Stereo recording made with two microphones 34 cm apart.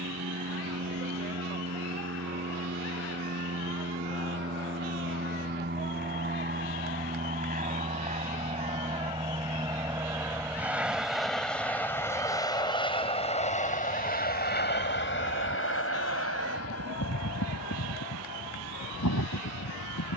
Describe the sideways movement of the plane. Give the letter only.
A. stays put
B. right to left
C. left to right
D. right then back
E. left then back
B.